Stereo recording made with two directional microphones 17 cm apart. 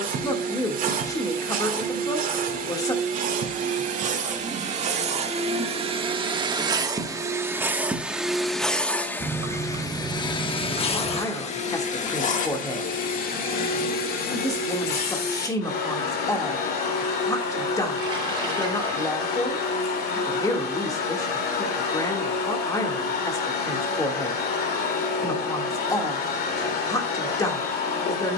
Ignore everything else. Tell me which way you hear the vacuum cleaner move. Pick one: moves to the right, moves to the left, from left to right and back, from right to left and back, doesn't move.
moves to the left.